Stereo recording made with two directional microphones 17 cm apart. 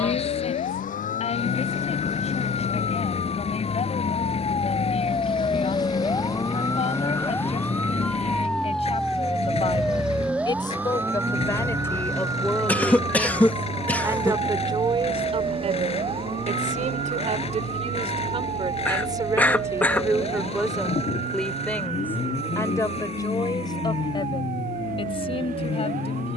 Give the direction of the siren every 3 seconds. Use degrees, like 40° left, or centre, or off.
50° left, 30° left, 10° left, 10° right, 20° right, 30° right, 40° right, 50° right, 50° right.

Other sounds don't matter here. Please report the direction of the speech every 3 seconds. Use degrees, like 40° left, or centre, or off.
40° left, 40° left, 40° left, 30° left, 10° right, 40° right, 20° right, 20° left, 30° left.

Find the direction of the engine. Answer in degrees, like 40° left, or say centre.
40° left.